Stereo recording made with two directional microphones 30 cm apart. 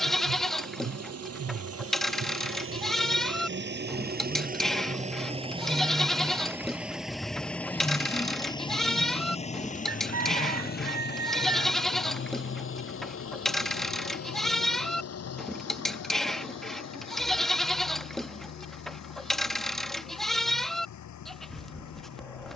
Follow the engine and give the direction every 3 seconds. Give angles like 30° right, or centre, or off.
50° right, 30° right, centre, 30° left, 40° left, 50° left, 60° left, 60° left.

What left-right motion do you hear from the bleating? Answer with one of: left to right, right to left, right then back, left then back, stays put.
stays put.